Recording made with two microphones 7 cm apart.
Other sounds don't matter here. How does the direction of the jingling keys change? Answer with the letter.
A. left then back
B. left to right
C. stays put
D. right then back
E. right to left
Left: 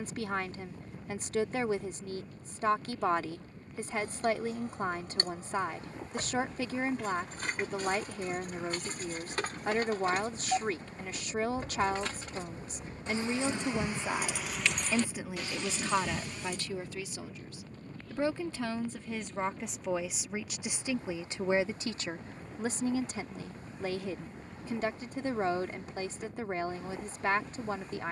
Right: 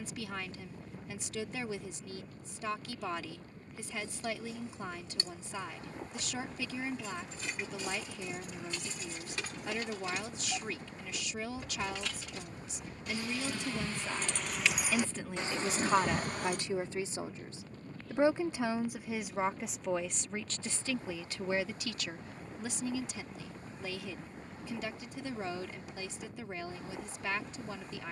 B.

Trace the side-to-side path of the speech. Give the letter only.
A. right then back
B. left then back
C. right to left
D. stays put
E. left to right
A.